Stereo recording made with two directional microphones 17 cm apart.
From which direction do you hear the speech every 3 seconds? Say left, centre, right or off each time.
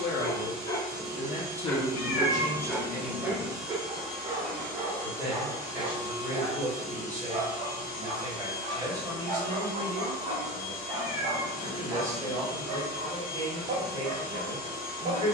left, centre, right, right, right.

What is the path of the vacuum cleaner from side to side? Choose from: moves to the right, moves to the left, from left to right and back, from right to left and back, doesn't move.
moves to the left.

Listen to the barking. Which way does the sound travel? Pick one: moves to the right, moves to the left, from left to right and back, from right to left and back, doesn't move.
moves to the right.